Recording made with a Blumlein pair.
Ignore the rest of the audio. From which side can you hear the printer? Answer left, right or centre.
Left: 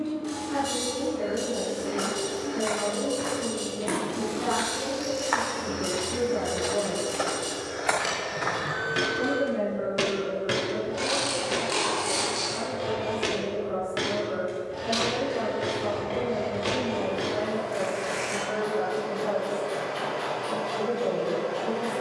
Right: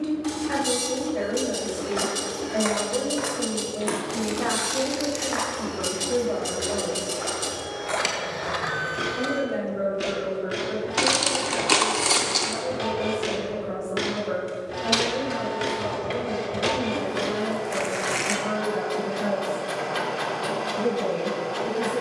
right.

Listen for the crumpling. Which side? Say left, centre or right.
right.